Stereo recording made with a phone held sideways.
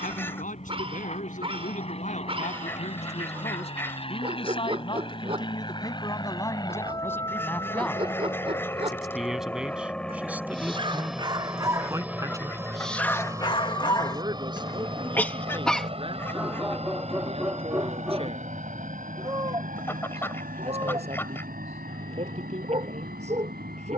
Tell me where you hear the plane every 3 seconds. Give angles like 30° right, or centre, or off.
50° left, 40° left, 20° left, centre, 20° right, 40° right, 50° right, 60° right.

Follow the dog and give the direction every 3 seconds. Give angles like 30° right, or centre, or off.
40° right, 40° right, 40° right, 30° right, 20° left, centre, 30° right, 40° right.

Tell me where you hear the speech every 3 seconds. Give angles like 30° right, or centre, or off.
60° left, 40° left, 10° left, 10° right, 30° right, 30° right, 40° right, 40° right.